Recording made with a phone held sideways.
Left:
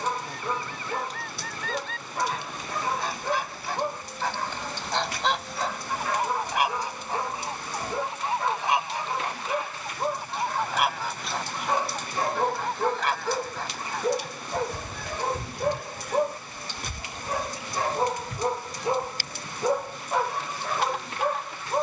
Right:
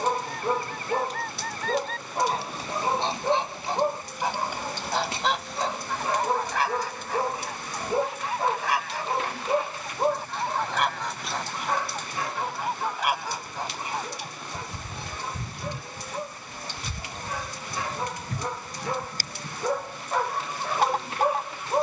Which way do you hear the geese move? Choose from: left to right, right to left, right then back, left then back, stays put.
left then back.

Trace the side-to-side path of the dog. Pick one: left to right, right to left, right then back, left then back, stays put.
left then back.